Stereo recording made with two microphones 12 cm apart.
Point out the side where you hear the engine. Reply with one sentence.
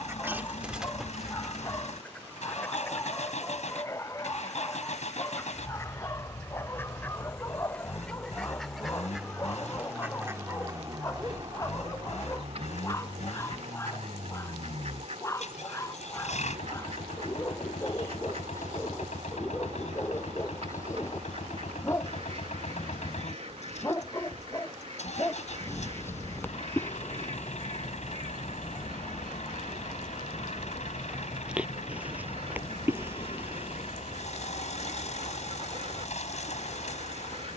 In this clip you hear the engine on the left.